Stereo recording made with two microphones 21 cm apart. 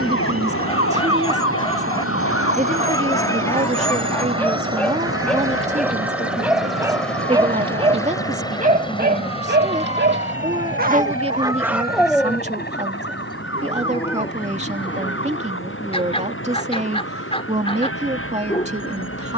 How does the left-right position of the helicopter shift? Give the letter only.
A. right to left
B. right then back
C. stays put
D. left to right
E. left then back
A.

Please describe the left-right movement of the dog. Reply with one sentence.
In this clip you hear the dog move from left to right and back again.